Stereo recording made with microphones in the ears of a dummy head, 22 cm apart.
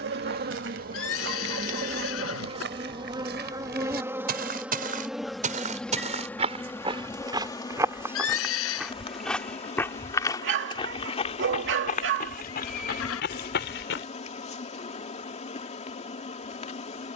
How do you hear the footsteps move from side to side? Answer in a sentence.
In this clip you hear the footsteps travel towards the left.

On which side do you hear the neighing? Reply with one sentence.
You can hear the neighing on the left.